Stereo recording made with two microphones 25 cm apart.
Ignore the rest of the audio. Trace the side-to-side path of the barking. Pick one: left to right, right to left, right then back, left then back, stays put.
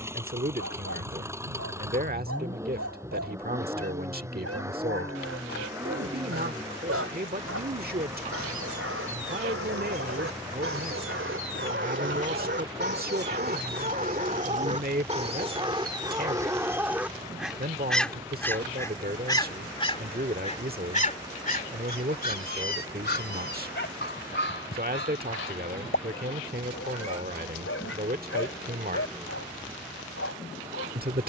right to left.